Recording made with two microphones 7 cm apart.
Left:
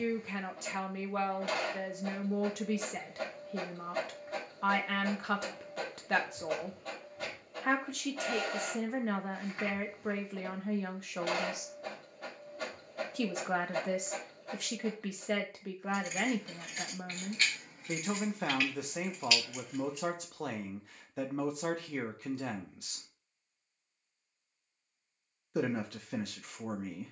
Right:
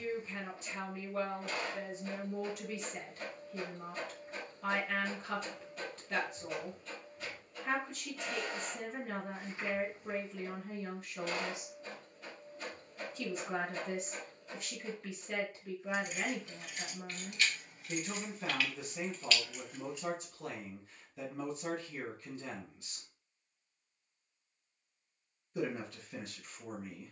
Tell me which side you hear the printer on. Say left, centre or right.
left.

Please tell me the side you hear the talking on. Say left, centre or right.
left.